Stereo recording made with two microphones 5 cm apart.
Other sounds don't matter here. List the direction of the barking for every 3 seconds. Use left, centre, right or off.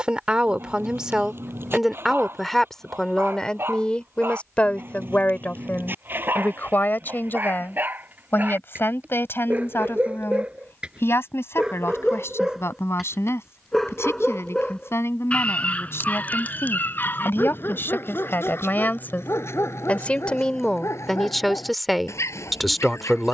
right, right, right, right, centre, left, left, left.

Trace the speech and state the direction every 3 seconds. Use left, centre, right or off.
centre, left, left, left, left, left, left, centre.